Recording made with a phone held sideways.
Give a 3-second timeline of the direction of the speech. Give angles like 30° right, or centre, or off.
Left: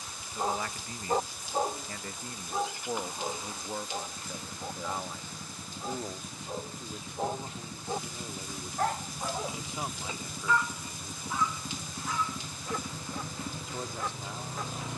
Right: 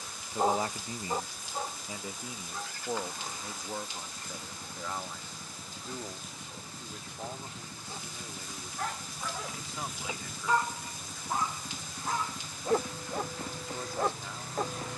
20° right, 10° left, 20° left, 20° left, 20° left.